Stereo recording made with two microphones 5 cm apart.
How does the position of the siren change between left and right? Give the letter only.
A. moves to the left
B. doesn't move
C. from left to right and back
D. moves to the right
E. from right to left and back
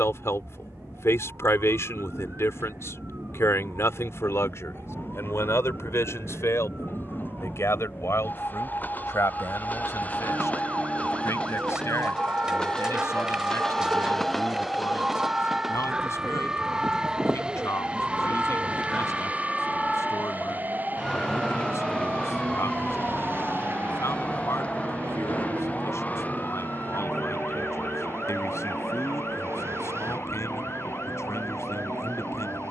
A.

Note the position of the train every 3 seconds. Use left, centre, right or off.
left, left, left, left, centre, centre, right, right, right, right, right.